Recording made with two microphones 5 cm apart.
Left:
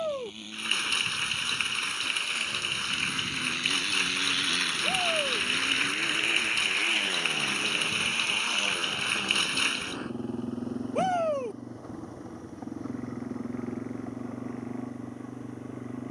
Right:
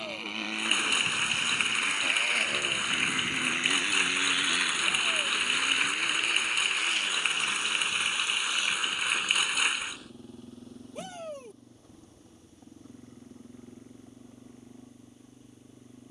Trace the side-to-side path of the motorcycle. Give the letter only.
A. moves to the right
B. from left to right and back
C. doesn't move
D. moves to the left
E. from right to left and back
D.